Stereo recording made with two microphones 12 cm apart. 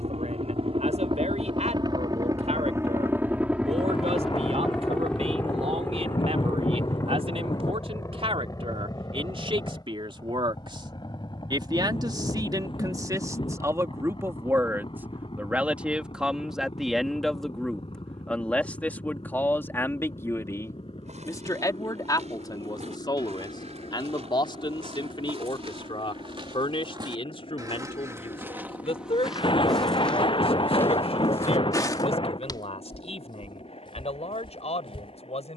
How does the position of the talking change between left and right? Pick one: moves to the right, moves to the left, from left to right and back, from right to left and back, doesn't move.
moves to the left.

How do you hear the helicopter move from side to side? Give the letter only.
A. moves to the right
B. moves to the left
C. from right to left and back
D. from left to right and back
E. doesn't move
B.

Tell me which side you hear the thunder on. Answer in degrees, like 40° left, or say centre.
50° left.